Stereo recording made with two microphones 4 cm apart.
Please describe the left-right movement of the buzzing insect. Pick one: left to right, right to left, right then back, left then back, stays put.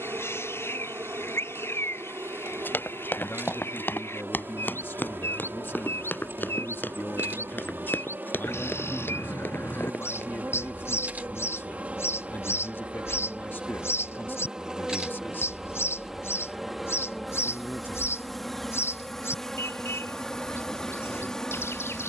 right to left.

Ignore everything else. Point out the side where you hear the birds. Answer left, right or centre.
left.